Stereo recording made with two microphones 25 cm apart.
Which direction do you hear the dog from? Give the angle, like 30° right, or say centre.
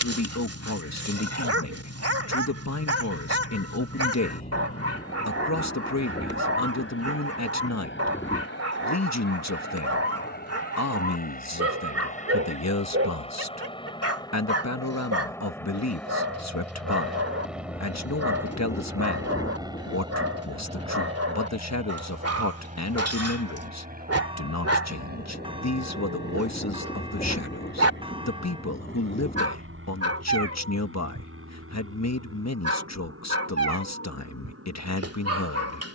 60° right.